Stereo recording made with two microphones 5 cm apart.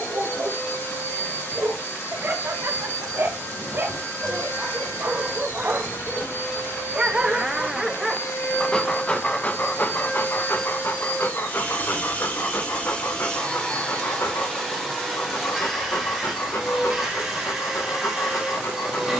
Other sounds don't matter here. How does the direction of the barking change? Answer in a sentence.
You can hear the barking go from the right side to the left.